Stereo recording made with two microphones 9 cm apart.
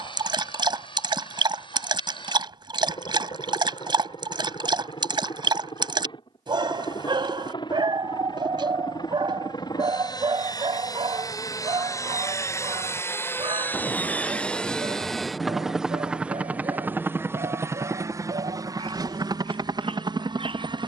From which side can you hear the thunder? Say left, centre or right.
centre.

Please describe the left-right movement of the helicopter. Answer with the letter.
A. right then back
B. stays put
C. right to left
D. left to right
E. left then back
D.